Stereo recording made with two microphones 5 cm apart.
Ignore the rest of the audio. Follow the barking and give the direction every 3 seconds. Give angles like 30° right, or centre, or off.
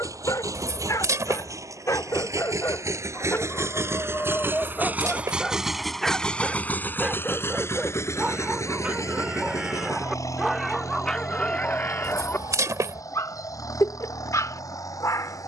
70° left, 30° left, 10° right, centre, 60° left.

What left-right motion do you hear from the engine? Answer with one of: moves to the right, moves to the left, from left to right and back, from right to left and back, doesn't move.
moves to the left.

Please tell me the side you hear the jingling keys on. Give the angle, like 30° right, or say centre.
70° right.